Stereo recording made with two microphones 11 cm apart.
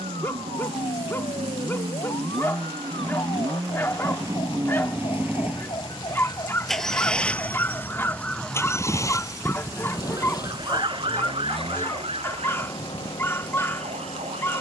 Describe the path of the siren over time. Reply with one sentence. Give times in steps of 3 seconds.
You can hear the siren on the left from 0 s and on the right from 9 s.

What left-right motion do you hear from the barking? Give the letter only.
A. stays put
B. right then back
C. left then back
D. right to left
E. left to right
A.